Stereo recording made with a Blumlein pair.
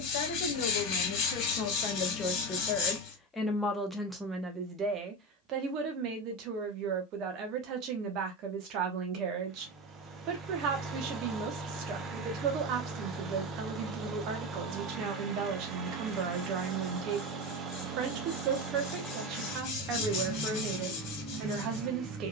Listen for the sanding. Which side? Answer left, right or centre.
left.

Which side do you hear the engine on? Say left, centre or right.
right.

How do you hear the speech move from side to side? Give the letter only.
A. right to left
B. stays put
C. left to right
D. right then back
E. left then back
C.